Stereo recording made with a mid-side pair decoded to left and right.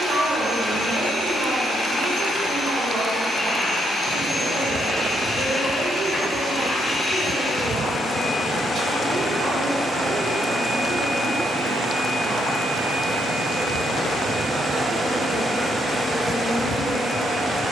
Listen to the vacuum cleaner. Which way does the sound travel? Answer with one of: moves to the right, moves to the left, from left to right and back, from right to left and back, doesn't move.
from left to right and back.